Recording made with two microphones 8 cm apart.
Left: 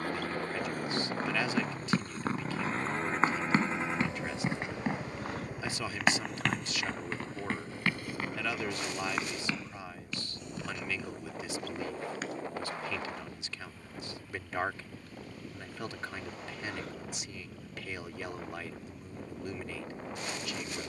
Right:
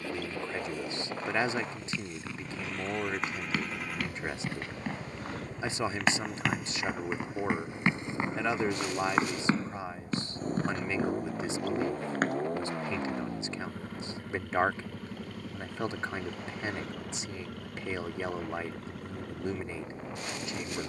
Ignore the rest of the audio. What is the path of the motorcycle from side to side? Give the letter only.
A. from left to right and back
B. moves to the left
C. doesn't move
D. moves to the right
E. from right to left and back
D.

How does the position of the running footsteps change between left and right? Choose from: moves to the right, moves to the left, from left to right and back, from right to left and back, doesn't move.
moves to the right.